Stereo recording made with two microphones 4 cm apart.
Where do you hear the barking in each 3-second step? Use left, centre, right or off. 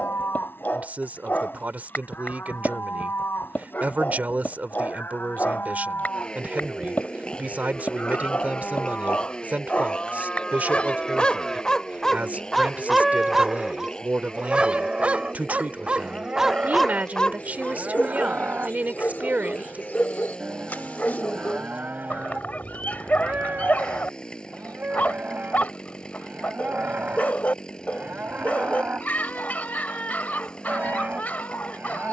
left, left, left, left, centre, centre, left, left, left, left, left.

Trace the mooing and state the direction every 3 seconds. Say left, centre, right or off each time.
left, left, left, left, centre, right, right, right, right, right, right.